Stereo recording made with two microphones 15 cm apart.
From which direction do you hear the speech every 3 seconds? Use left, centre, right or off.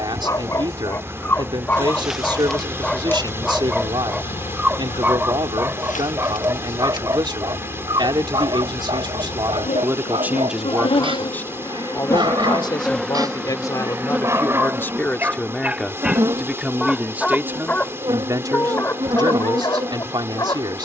right, right, right, centre, left, centre, right.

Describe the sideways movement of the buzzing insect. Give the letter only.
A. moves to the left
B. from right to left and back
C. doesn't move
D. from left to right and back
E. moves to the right
B.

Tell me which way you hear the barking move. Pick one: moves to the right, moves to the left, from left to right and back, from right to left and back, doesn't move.
from left to right and back.